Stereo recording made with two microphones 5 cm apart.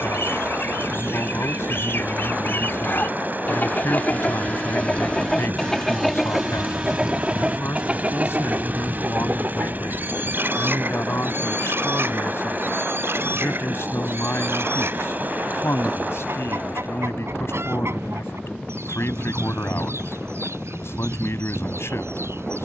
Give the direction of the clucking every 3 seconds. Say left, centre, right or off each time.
left, left, right, right, right, right, right, right.